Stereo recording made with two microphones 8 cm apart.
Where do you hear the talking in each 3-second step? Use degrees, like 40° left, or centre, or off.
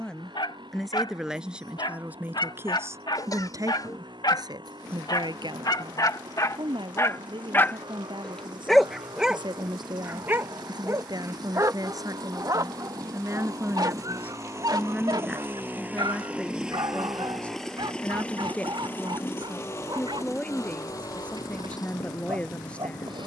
10° right, 60° right, 80° right, 60° right, 30° right, centre, 10° left, 10° left.